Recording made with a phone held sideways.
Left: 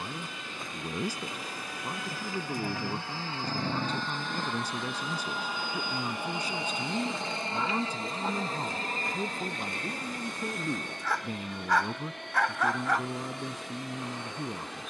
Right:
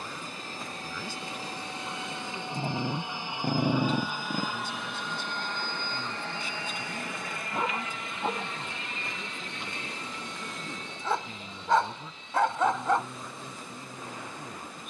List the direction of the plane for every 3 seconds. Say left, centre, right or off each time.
right, centre, left, left, left.